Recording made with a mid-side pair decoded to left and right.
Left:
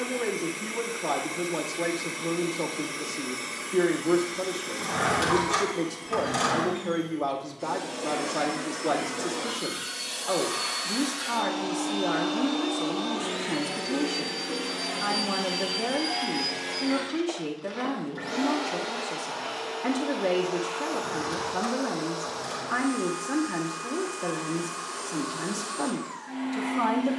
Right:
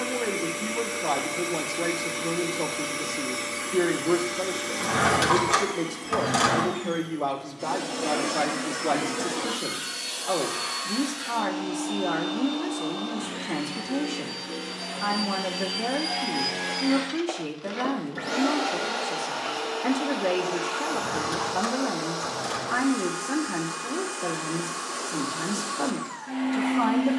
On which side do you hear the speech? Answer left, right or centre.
centre.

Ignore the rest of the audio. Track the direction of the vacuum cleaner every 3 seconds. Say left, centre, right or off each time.
right, right, right, centre, left, centre, right, right, right.